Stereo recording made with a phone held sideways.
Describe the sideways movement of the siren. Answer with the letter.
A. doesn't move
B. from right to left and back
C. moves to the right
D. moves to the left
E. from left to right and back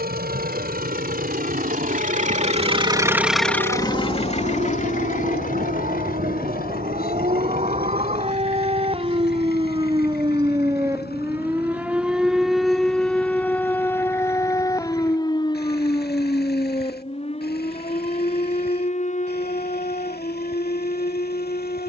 D.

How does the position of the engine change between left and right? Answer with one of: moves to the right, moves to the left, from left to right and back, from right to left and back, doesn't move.
moves to the left.